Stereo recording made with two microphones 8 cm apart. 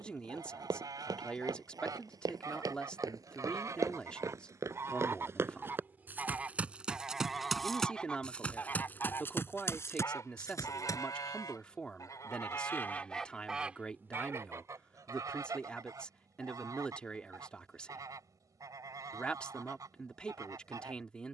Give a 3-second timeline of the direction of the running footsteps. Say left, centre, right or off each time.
right, right, centre, left, off, off, off.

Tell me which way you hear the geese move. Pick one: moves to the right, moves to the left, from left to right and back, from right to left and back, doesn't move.
from right to left and back.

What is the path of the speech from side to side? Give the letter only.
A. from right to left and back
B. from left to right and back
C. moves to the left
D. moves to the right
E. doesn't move
E.